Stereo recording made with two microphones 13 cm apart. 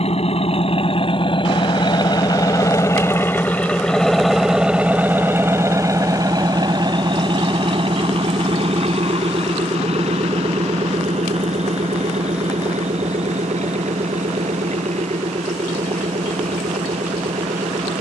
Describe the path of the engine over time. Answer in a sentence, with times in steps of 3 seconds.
In this clip you hear the engine on the left from 0 s, in the centre from 3 s and on the right from 6 s.